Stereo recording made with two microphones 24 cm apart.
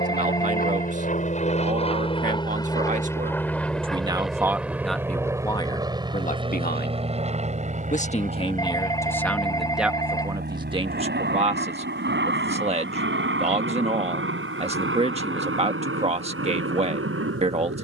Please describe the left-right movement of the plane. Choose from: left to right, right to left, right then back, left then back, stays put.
left to right.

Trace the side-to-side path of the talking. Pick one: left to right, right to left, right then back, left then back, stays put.
left then back.